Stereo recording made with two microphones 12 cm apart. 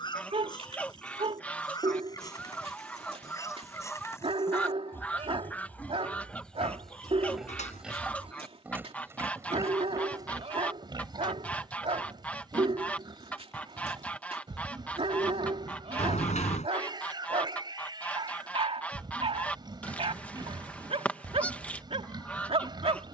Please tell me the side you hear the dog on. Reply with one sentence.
In this clip you hear the dog on the right.